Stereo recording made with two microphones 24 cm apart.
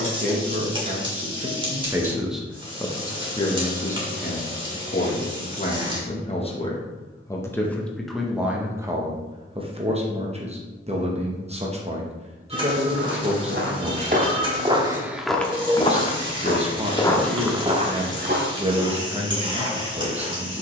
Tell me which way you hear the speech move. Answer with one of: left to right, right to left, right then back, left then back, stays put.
left then back.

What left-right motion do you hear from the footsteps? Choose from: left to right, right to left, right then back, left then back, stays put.
left then back.